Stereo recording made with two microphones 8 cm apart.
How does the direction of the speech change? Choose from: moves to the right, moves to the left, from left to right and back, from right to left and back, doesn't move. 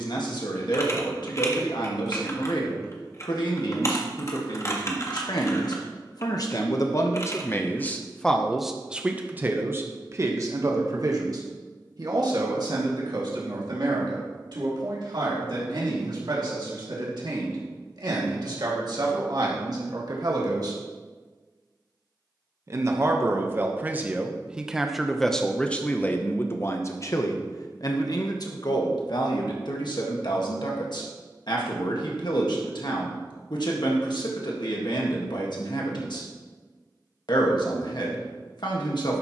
from left to right and back.